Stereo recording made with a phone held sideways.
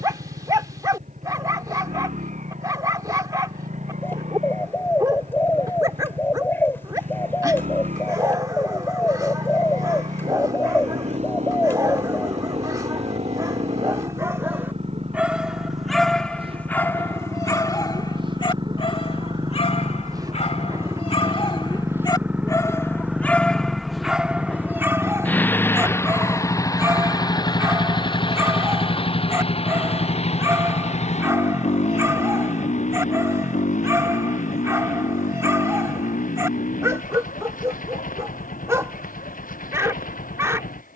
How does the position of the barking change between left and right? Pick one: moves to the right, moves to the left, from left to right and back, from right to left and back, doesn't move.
from right to left and back.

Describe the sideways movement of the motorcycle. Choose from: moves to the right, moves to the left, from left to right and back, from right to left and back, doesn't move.
moves to the left.